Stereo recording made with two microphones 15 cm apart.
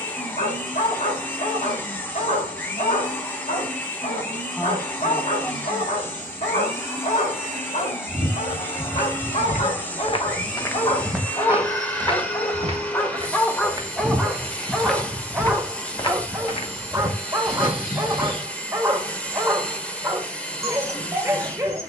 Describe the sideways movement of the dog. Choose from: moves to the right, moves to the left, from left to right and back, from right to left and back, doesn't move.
moves to the right.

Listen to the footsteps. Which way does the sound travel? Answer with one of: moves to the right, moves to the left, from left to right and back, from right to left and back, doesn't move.
from left to right and back.